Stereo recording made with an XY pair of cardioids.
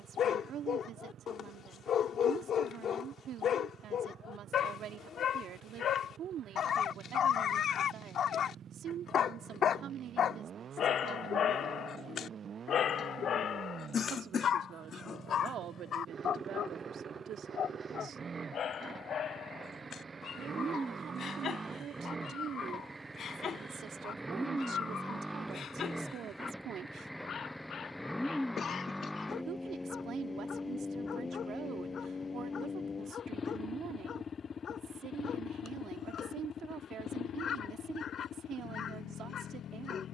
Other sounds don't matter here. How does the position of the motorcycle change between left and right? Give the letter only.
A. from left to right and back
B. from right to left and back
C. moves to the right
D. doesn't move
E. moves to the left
E.